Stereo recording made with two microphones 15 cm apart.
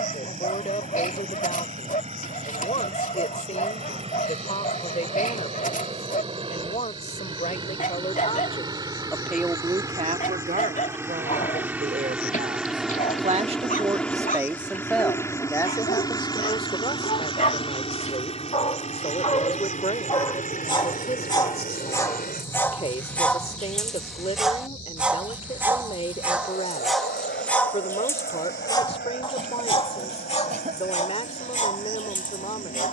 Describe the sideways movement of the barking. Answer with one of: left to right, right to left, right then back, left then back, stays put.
right then back.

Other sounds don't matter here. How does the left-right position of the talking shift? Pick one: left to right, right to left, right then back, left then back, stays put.
right then back.